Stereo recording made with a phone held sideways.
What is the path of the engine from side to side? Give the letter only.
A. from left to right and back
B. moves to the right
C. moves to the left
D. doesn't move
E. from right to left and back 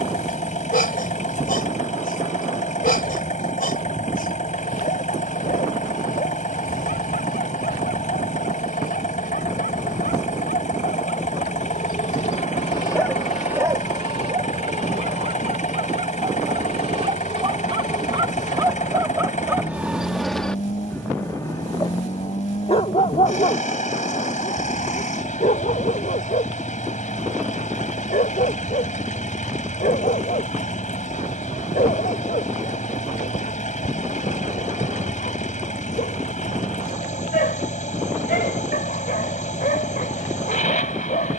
D.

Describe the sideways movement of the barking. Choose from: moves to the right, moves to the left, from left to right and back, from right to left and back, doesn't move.
from left to right and back.